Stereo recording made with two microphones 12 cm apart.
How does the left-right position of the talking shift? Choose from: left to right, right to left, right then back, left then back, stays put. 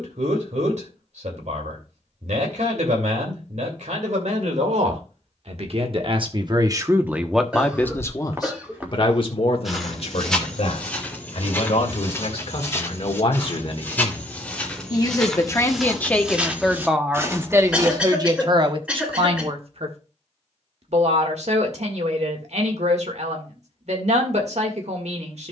left then back.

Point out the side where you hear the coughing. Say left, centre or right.
centre.